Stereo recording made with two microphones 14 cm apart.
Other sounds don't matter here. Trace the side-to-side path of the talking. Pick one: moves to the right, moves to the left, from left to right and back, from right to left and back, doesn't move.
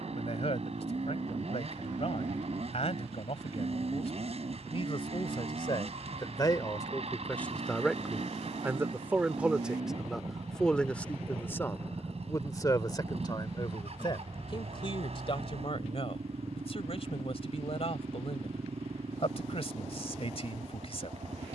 from left to right and back.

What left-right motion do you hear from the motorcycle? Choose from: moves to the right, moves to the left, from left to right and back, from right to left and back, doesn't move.
doesn't move.